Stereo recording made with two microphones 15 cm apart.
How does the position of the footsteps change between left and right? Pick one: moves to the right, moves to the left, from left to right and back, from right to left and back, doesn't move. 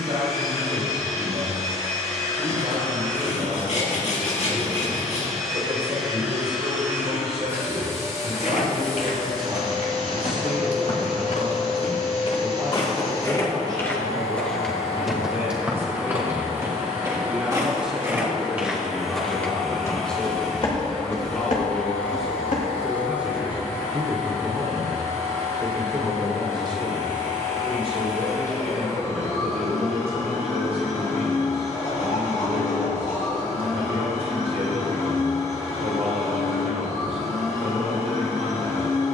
from left to right and back.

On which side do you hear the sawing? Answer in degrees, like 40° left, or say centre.
60° left.